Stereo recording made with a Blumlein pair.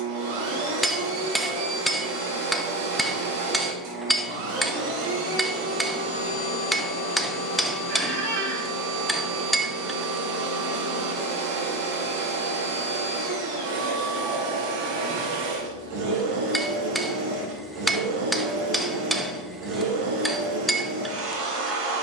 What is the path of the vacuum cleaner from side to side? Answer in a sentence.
You can hear the vacuum cleaner stay put.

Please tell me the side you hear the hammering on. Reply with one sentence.
In this clip you hear the hammering in the centre.